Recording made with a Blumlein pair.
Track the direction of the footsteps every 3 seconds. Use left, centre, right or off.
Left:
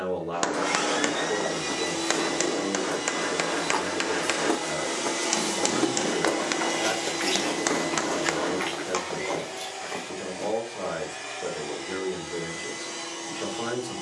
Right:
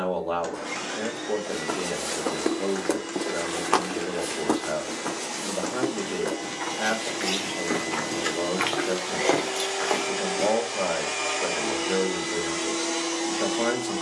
right, centre, centre, right, off.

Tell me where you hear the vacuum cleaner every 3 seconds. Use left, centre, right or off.
left, left, centre, right, right.